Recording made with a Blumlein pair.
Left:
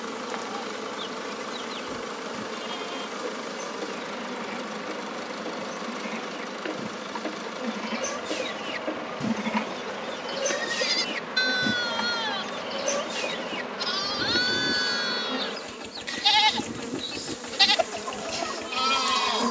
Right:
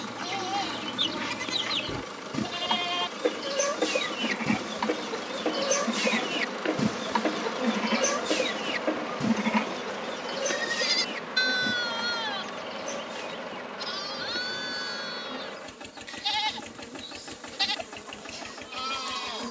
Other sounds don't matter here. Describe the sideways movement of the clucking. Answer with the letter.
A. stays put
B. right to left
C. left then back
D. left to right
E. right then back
B.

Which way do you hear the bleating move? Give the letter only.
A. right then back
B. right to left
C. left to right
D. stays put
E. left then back
B.